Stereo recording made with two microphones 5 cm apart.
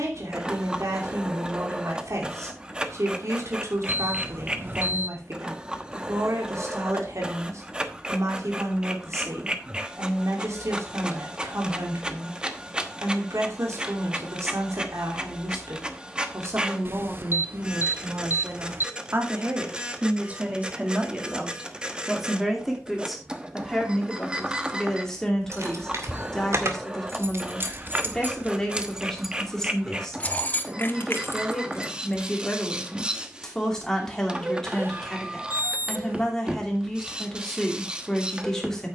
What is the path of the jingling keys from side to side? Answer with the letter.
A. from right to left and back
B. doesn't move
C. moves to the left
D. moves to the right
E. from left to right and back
C.